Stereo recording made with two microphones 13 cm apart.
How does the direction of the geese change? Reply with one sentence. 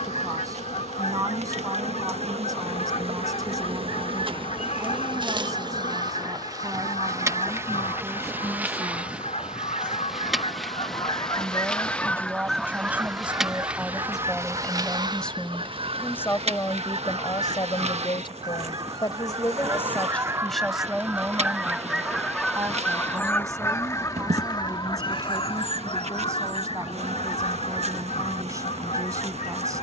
You can hear the geese go right and come back.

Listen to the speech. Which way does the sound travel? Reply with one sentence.
In this clip you hear the speech move from right to left and back again.